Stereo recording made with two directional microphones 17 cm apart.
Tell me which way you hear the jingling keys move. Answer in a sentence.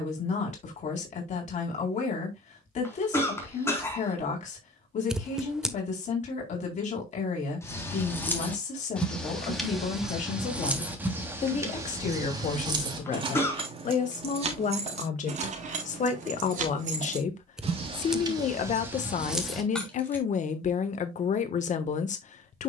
In this clip you hear the jingling keys move from left to right and back again.